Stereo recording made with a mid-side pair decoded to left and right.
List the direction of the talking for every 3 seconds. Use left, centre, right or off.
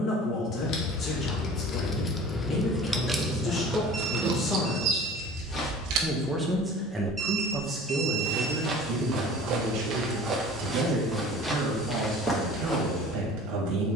left, left, right, right, right.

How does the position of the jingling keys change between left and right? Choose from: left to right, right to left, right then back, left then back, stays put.
left to right.